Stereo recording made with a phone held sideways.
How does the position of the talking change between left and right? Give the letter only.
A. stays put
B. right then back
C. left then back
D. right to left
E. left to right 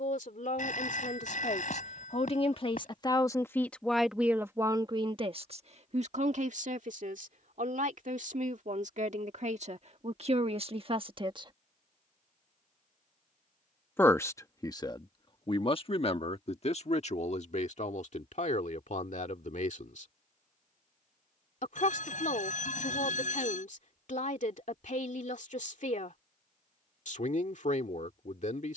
B.